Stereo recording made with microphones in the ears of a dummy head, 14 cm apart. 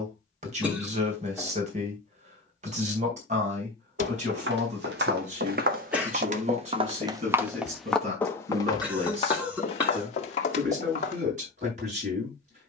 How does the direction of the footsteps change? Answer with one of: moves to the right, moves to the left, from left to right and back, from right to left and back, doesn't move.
moves to the left.